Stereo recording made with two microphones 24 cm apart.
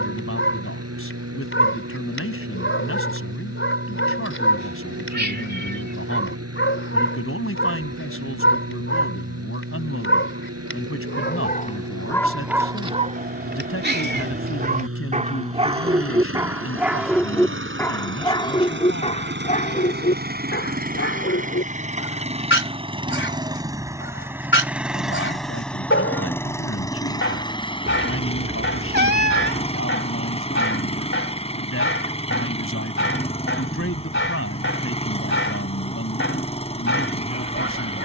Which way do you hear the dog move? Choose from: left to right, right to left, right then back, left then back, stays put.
right then back.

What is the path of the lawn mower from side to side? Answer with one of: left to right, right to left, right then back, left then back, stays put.
right to left.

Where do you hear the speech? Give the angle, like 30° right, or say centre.
60° left.